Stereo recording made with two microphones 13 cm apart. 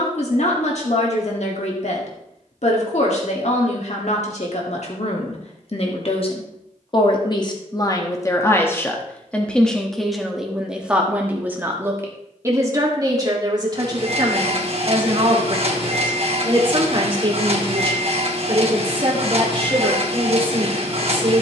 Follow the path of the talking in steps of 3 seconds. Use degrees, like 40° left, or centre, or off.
60° left, 60° left, 30° left, centre, 30° right, 40° right, 40° right.